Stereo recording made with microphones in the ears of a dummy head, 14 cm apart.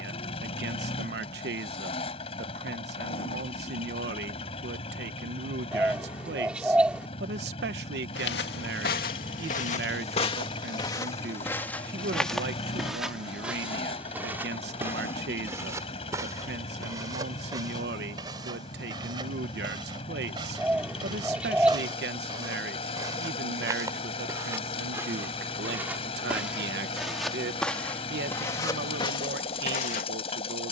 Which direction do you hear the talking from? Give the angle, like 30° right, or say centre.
70° right.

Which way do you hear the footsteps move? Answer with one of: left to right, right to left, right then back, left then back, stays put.
right then back.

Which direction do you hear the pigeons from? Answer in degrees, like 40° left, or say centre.
10° right.